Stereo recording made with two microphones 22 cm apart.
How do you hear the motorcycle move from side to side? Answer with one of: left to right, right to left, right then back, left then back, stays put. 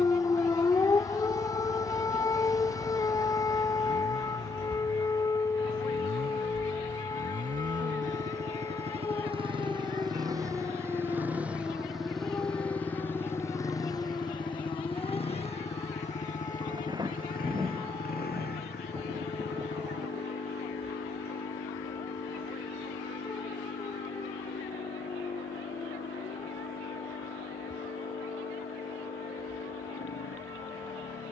right to left.